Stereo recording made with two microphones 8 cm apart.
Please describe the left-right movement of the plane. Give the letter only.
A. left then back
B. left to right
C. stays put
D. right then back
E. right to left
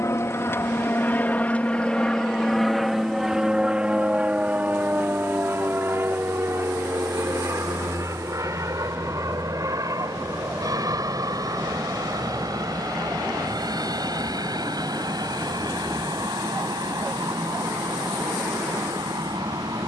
B.